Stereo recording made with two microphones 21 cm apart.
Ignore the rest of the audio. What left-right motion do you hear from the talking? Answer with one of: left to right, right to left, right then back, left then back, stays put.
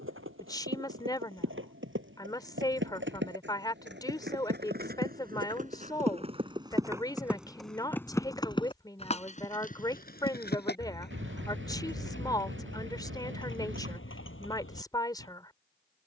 stays put.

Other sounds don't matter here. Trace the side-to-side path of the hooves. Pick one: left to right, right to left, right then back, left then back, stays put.
right to left.